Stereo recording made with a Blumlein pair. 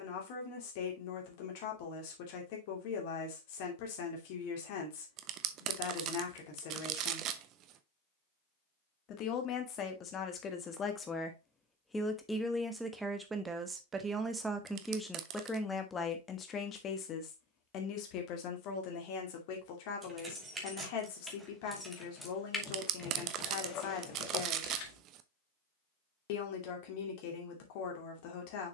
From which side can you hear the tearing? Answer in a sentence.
You can hear the tearing on the right.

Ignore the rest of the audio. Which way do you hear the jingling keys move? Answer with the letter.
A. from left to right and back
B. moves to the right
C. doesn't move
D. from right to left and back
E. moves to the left
E.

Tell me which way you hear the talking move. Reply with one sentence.
You can hear the talking go right and come back.